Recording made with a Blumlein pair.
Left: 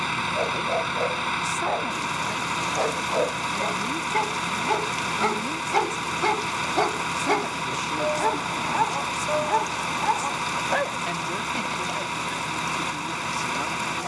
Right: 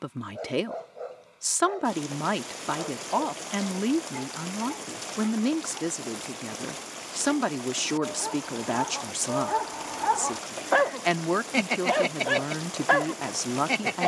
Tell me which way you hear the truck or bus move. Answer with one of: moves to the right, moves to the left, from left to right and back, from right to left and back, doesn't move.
doesn't move.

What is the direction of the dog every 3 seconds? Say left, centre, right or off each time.
left, left, left, centre, right.